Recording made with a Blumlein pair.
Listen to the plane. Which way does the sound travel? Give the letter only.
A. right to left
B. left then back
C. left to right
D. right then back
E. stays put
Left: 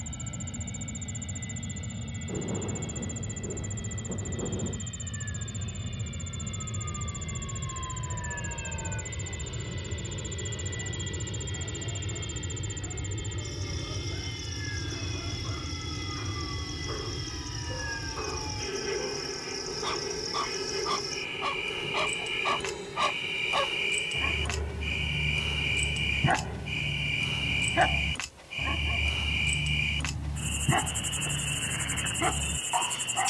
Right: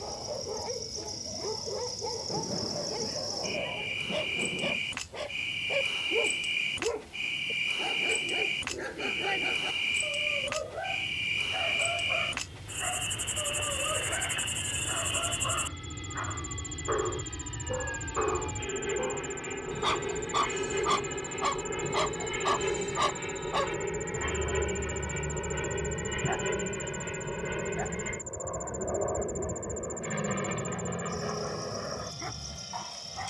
C.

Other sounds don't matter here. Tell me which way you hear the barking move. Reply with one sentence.
In this clip you hear the barking travel towards the left.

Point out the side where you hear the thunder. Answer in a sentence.
You can hear the thunder in the centre.